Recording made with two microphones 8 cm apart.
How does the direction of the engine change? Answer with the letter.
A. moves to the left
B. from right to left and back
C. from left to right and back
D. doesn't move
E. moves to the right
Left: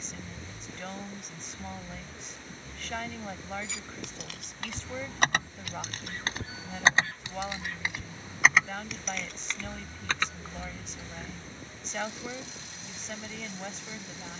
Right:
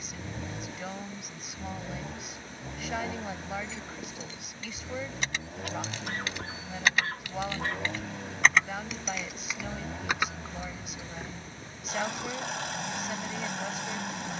D.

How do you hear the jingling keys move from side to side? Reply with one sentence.
In this clip you hear the jingling keys move to the right.